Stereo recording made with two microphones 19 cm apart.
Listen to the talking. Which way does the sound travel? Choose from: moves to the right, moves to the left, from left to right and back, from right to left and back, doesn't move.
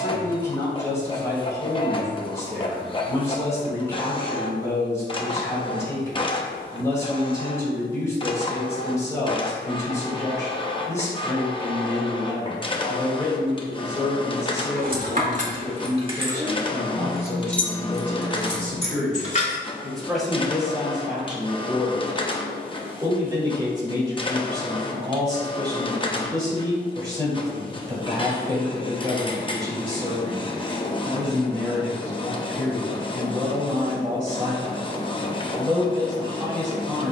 moves to the right.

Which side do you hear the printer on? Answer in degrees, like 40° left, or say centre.
30° left.